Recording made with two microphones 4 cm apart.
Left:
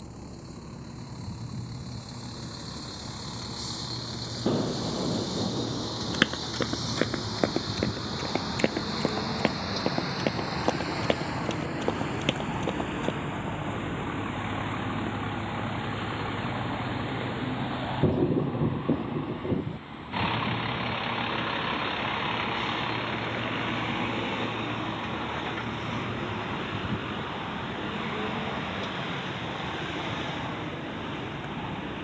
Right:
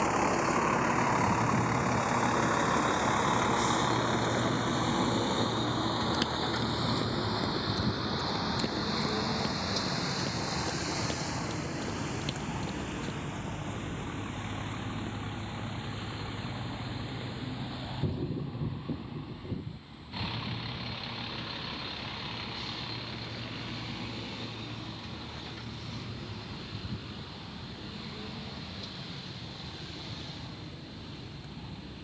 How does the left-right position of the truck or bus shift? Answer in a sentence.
You can hear the truck or bus go from the right side to the left.